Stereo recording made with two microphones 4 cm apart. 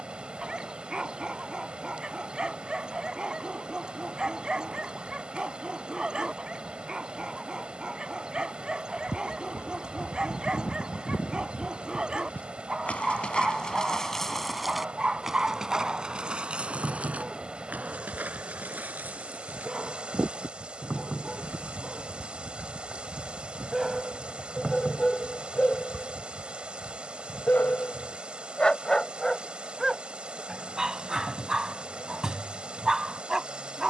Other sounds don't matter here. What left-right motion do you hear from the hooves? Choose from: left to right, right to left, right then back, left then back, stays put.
left to right.